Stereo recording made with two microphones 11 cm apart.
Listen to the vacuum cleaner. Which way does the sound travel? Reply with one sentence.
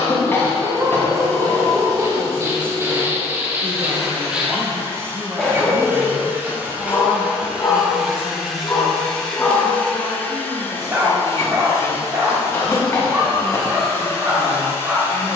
You can hear the vacuum cleaner move from right to left.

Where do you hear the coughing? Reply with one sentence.
You can hear the coughing on the left.